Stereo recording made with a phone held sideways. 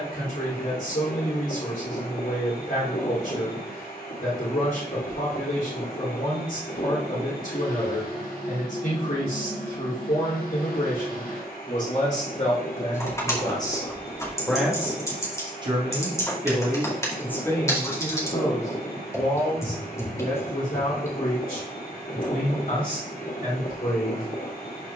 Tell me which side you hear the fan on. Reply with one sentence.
In this clip you hear the fan on the left.